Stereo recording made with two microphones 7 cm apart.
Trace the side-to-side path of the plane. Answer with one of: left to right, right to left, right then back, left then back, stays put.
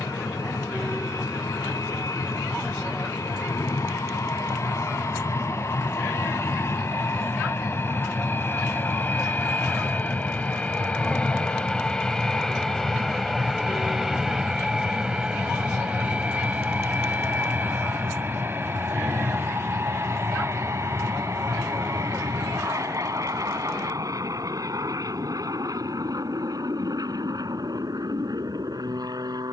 left to right.